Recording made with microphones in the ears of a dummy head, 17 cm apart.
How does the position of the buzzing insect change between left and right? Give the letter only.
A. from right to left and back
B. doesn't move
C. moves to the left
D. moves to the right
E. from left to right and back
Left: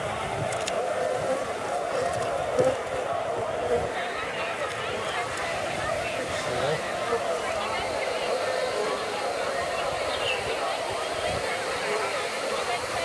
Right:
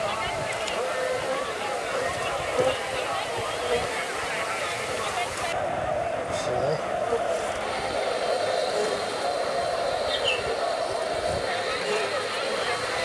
D.